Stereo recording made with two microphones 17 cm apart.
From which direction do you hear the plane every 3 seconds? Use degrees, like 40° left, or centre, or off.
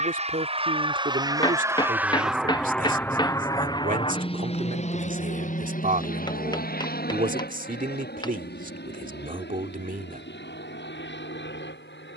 20° right, 30° left, 60° left, 70° left.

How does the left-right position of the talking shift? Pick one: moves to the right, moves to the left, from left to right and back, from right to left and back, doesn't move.
doesn't move.